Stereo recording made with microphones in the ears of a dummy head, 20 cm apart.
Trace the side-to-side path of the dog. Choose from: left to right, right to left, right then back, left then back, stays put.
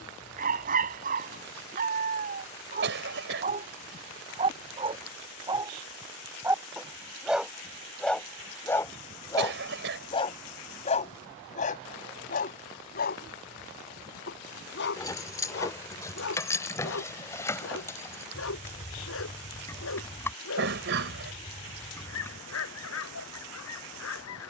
right to left.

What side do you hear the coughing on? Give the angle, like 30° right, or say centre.
60° right.